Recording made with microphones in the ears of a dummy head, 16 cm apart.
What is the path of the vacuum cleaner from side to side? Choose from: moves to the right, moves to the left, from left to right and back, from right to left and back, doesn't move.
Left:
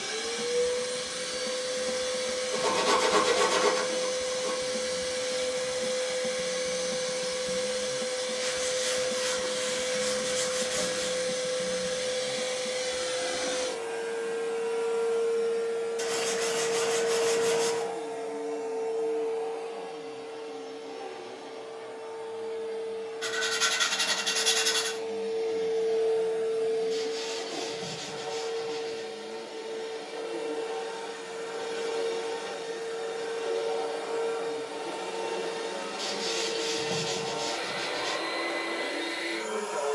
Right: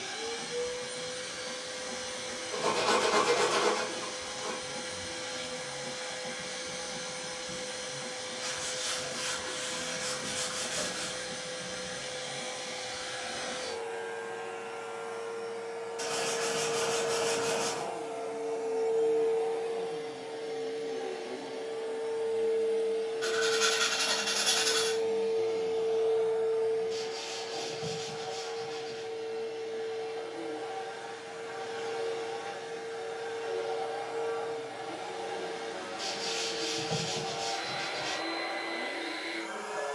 from left to right and back.